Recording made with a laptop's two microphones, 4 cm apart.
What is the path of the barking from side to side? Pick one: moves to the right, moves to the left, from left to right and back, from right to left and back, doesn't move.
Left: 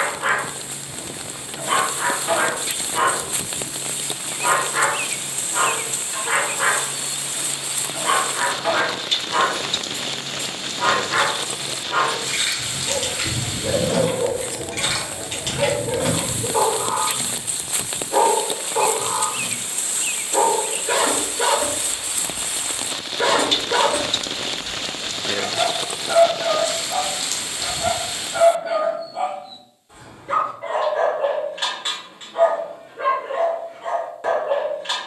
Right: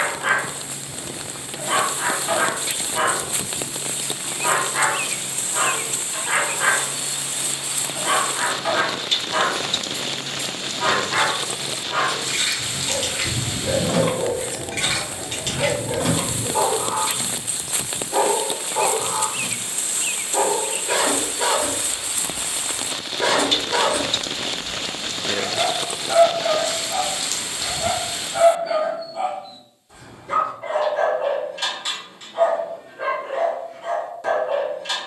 doesn't move.